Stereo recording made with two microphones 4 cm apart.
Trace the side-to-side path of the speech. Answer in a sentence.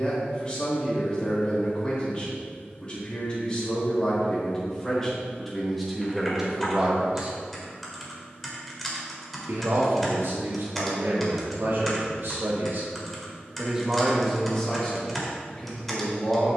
In this clip you hear the speech go right and come back.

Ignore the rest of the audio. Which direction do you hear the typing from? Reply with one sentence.
In this clip you hear the typing in the centre.